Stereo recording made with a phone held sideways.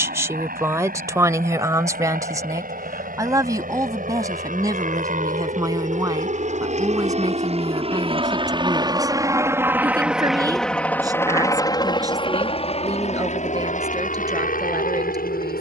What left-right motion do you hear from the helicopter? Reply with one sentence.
You can hear the helicopter go from the right side to the left.